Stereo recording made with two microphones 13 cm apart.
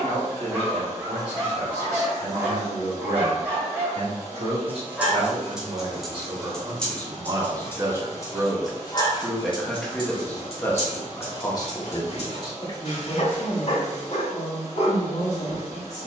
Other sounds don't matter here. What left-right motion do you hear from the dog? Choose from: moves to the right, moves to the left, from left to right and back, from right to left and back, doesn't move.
moves to the left.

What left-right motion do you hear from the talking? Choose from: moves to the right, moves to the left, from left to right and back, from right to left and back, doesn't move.
moves to the left.